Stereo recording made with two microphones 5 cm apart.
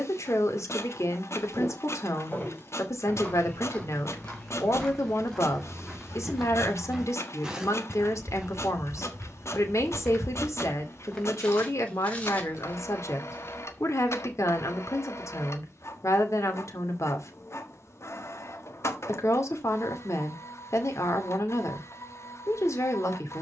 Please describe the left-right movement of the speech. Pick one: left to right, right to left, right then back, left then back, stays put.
stays put.